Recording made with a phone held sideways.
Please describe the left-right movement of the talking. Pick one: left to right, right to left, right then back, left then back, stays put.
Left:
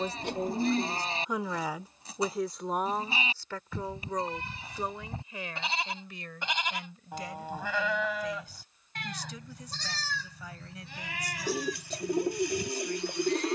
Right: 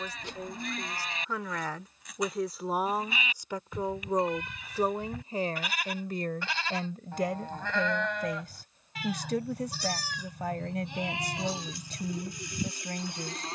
left to right.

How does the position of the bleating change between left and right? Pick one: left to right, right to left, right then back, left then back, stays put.
left to right.